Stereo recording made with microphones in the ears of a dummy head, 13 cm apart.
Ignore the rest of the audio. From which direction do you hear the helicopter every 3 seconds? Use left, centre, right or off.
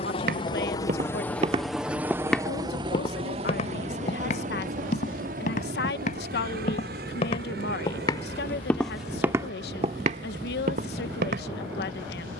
centre, right, right, right.